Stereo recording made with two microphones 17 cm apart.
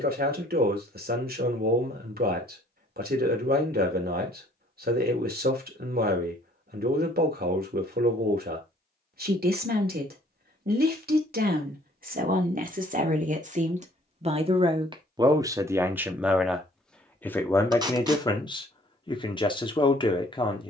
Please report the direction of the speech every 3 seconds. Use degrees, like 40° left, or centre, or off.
60° right, 60° right, 60° right, 60° right, 50° right, centre, 30° left.